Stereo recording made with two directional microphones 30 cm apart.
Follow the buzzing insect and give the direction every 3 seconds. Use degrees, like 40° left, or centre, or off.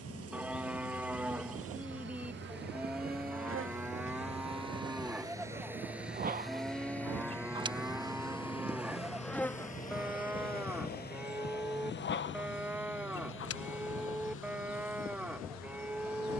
50° right, 40° right, 20° right, 20° left, 50° left, 60° left.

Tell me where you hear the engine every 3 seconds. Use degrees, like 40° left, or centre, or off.
40° right, 20° right, 10° left, 30° left, 40° left, 50° left.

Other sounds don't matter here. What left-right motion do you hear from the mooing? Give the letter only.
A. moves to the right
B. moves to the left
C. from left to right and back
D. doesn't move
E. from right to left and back
D.